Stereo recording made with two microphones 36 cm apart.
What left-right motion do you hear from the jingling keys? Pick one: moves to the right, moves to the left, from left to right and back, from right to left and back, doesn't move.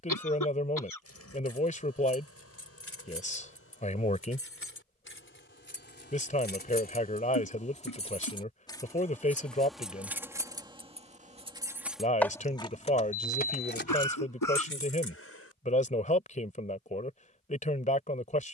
from left to right and back.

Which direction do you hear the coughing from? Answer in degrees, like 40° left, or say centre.
70° left.